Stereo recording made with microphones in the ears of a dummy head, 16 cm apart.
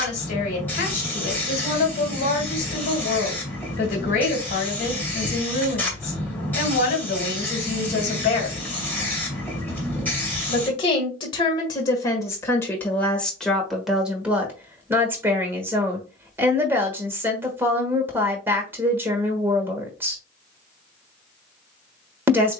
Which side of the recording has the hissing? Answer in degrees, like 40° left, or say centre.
10° left.